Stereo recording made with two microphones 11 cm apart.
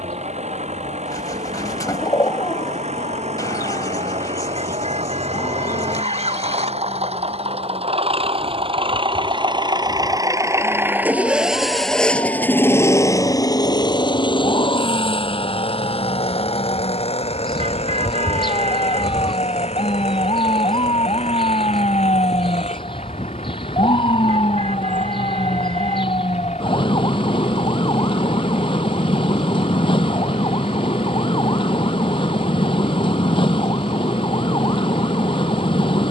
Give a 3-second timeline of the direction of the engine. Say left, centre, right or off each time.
right, right, right, right, left, left, left, left, left, left, left, left.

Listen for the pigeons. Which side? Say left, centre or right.
left.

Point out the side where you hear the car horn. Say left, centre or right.
right.